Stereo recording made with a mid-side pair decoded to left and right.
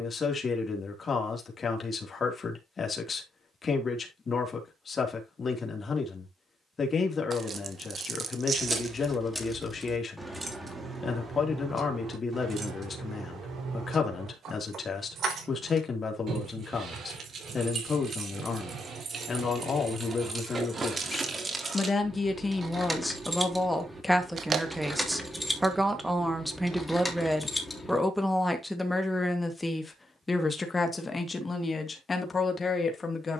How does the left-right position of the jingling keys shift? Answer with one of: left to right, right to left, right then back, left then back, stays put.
right then back.